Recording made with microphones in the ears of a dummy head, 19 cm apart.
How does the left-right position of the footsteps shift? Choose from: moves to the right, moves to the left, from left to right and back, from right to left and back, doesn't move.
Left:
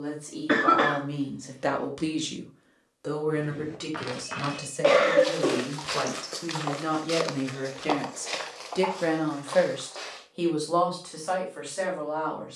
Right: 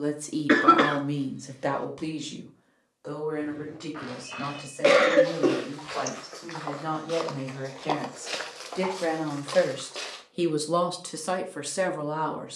moves to the right.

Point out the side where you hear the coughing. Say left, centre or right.
right.